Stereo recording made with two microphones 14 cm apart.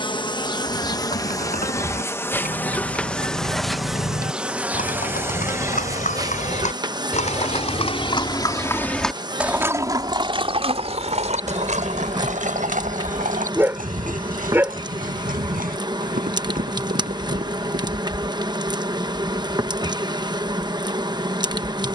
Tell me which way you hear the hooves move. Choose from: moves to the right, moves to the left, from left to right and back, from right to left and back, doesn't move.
moves to the right.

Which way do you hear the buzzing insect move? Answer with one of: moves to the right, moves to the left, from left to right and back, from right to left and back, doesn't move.
moves to the right.